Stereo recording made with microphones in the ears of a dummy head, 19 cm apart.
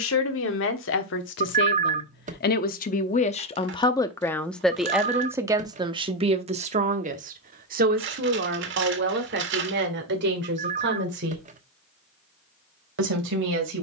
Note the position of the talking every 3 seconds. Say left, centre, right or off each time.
left, centre, right, right, right.